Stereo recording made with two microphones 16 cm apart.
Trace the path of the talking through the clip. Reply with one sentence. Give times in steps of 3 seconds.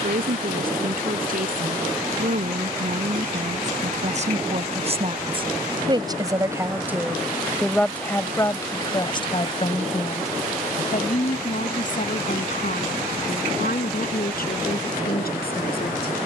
You can hear the talking on the right from 0 s, in the centre from 6 s and on the left from 9 s.